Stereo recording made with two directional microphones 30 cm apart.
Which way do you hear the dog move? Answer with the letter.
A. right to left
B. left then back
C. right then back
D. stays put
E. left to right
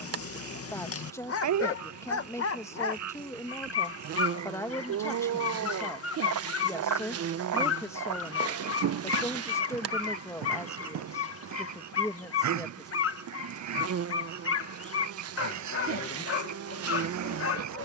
D.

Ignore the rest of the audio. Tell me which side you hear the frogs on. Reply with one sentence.
In this clip you hear the frogs on the right.